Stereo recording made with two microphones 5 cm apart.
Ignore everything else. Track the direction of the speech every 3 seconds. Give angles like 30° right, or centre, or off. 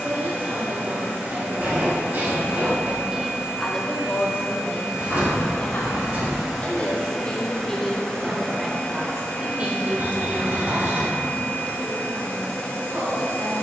50° right, 40° left, 10° left, 40° right, 60° right.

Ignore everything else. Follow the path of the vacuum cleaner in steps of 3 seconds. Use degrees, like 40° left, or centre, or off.
20° right, 10° right, 10° left, 30° left, 30° left.